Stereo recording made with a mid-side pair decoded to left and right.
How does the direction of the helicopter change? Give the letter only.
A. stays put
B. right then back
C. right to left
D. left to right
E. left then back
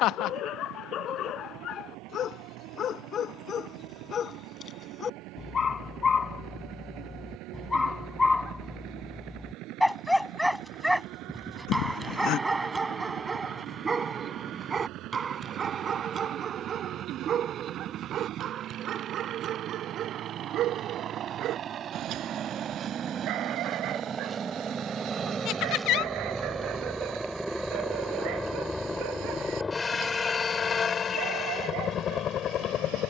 C.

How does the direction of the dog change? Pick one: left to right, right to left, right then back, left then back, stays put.
left to right.